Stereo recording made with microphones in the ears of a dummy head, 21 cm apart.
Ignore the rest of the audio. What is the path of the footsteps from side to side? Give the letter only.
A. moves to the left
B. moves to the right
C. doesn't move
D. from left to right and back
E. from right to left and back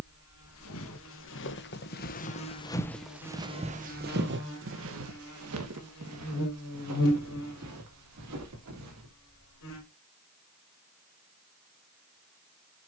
B.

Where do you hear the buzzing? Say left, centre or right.
left.